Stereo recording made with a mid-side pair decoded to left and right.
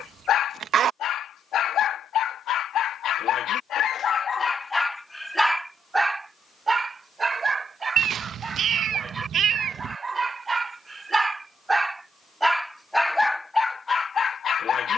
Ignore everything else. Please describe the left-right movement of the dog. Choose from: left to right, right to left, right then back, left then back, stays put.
right then back.